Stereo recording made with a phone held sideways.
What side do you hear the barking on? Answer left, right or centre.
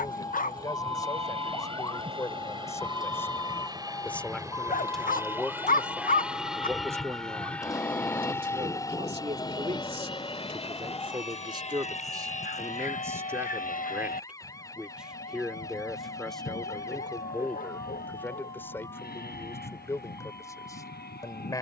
left.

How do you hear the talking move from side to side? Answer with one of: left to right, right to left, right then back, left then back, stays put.
right then back.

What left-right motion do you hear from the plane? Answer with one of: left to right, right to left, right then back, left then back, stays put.
right to left.